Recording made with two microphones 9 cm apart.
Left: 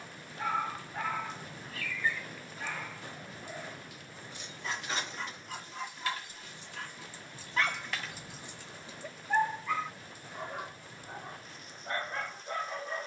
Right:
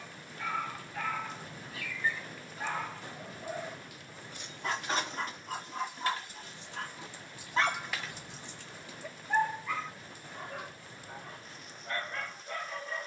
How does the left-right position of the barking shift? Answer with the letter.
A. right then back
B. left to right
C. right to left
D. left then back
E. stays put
A.